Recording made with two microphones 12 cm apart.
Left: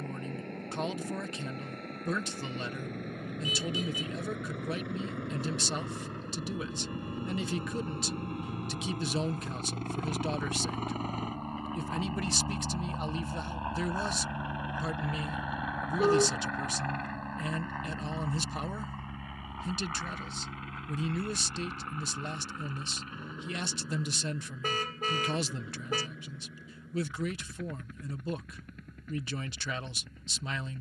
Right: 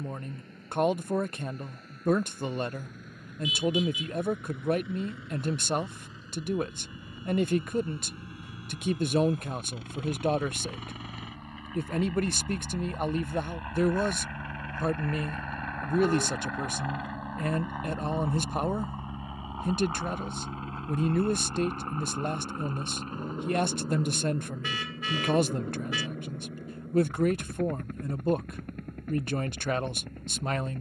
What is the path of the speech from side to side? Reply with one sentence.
You can hear the speech stay put.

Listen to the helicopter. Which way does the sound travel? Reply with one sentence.
In this clip you hear the helicopter move to the right.